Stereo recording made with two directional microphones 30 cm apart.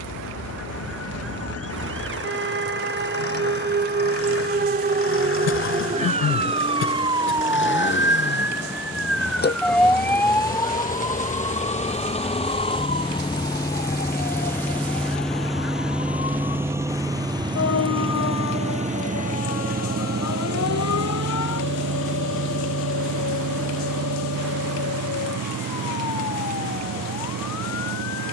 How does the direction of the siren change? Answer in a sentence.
In this clip you hear the siren travel towards the left.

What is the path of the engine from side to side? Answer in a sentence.
You can hear the engine move from left to right.